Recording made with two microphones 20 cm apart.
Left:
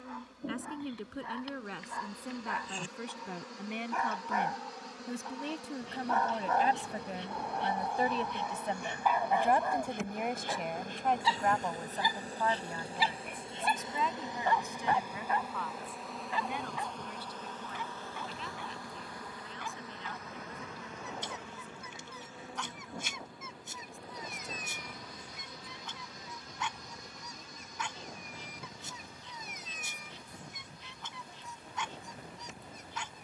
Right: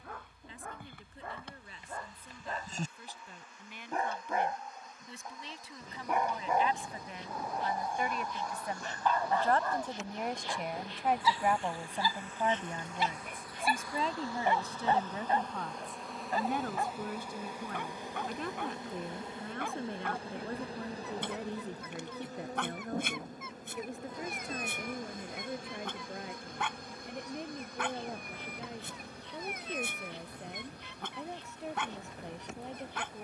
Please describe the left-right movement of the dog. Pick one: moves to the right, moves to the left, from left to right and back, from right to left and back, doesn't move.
from right to left and back.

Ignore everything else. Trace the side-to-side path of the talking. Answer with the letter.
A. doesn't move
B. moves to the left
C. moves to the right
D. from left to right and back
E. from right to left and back
C.